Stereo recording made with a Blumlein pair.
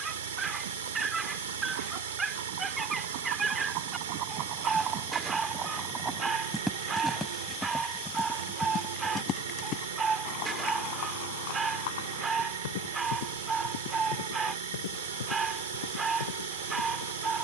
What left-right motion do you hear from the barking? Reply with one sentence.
You can hear the barking stay in one place.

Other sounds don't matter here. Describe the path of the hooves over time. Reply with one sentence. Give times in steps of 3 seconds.
You can hear the hooves on the right from 0 s, in the centre from 6 s and on the left from 9 s.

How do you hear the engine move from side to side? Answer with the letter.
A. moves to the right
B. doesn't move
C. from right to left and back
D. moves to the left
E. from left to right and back
B.